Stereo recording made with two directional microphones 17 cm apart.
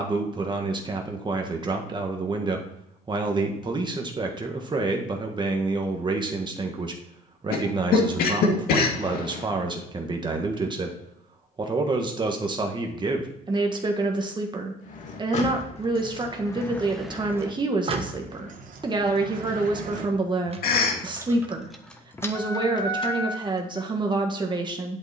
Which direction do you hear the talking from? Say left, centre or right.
right.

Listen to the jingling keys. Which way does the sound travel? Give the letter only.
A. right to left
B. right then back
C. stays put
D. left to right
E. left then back
B.